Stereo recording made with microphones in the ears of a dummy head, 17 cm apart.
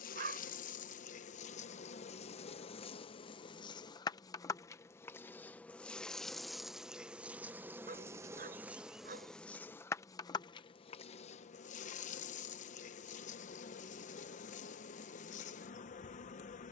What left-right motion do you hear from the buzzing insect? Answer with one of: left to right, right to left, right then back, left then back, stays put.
right then back.